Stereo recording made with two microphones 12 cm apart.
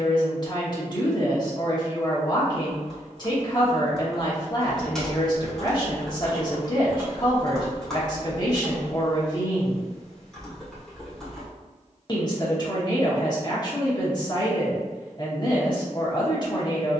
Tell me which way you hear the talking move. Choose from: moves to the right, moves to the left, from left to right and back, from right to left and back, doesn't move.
doesn't move.